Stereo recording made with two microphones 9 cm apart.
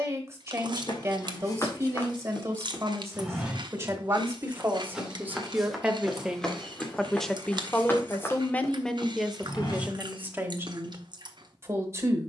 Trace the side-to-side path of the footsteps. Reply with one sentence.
You can hear the footsteps go right and come back.